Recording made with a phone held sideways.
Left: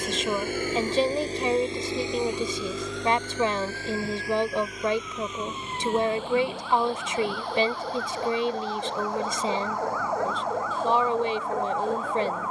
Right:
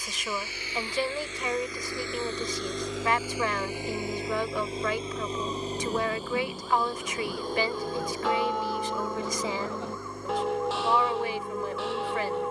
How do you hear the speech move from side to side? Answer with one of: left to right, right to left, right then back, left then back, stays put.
stays put.